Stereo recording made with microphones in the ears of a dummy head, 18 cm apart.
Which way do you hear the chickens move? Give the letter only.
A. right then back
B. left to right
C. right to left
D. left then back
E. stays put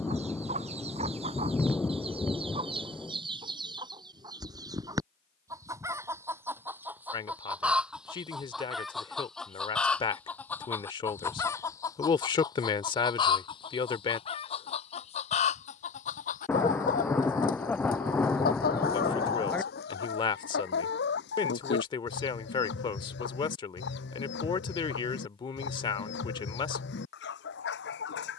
C.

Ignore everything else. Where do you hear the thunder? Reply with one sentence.
In this clip you hear the thunder in the centre.